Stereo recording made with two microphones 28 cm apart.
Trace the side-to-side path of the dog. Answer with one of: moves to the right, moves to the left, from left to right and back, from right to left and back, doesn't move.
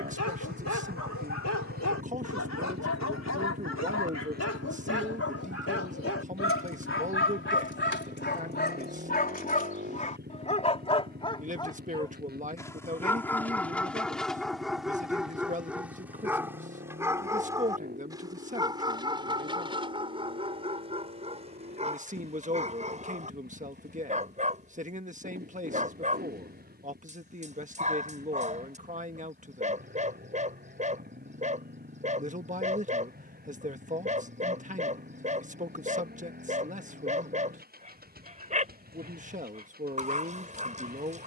moves to the right.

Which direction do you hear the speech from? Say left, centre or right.
right.